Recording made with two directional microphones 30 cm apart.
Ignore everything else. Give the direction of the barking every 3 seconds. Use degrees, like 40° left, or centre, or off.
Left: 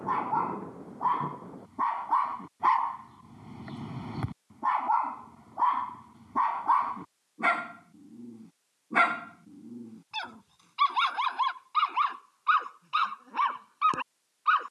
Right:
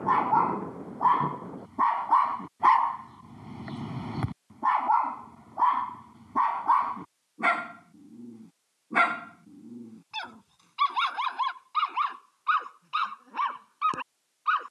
30° right, 20° right, 10° right, centre, 10° left.